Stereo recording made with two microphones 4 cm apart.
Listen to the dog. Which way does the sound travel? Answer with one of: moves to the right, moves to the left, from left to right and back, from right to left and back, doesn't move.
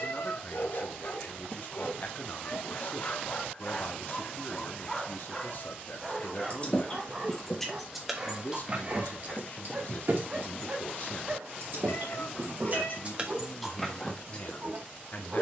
moves to the right.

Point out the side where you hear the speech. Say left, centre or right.
left.